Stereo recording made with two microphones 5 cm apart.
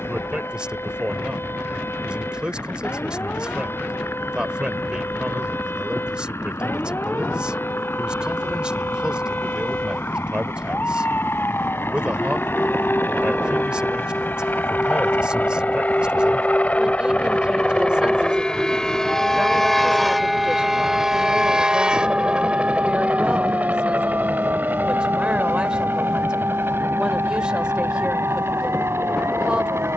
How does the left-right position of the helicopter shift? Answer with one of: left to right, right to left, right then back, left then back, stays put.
left to right.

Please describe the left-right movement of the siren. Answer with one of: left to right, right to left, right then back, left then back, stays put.
left to right.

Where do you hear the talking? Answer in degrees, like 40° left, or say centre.
20° right.